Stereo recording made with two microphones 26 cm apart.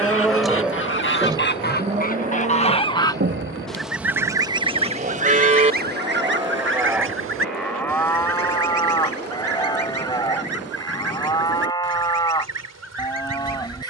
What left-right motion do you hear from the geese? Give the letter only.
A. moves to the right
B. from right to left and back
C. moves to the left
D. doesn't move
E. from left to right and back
A.